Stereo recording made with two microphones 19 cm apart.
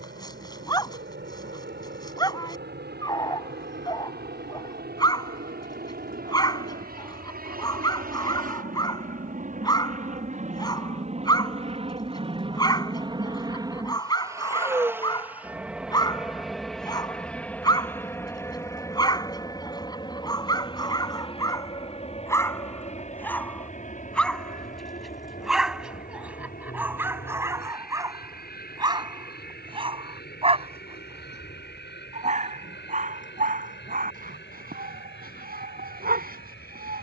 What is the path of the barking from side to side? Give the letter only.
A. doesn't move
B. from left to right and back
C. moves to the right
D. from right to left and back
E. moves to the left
C.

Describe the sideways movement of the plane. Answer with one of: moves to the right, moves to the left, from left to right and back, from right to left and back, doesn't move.
moves to the left.